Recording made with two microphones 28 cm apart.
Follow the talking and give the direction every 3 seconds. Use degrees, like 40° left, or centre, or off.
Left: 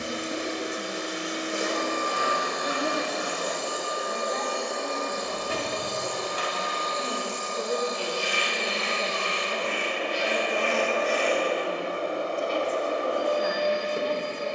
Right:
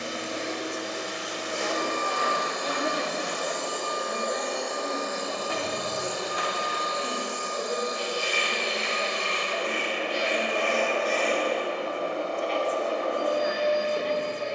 30° left, 10° right, 20° left, 50° left, 50° left.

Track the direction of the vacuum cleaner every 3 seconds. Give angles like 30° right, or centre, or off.
20° left, centre, 20° right, centre, 20° left.